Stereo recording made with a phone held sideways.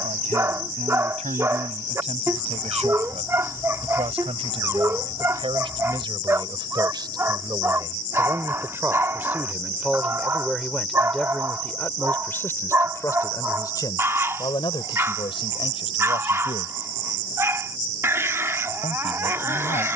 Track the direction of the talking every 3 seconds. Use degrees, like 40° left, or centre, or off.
50° right, 40° right, 30° right, centre, 20° left, 40° left, 60° left.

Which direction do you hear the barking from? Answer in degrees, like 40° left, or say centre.
20° right.